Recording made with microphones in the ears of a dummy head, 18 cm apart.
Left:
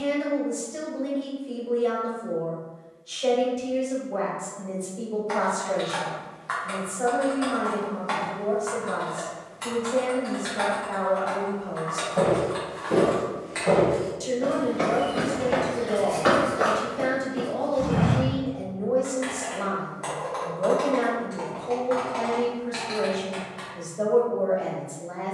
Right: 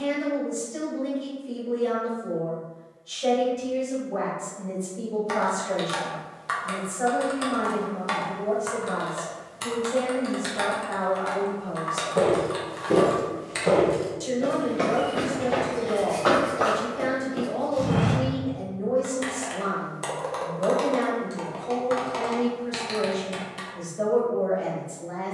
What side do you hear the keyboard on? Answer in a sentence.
You can hear the keyboard on the right.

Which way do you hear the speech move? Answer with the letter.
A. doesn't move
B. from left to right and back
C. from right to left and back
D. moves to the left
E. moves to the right
A.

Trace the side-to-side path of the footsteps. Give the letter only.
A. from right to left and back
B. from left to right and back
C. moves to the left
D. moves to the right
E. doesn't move
A.